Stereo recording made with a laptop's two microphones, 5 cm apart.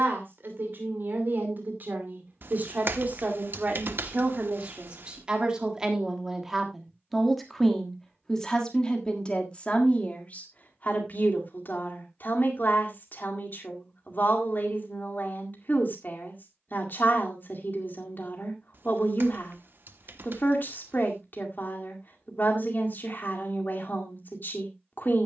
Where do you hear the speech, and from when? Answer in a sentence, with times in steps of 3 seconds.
In this clip you hear the speech on the right from 0 s, in the centre from 6 s and on the left from 9 s.